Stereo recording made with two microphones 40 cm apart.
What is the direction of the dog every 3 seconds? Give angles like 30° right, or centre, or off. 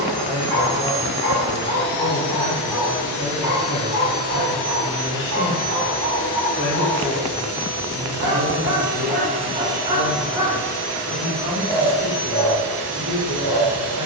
20° left, 40° right, 40° right, 10° right, 20° left.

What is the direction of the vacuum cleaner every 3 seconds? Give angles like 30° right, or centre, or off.
70° right, 70° right, 50° right, 10° right, 60° right.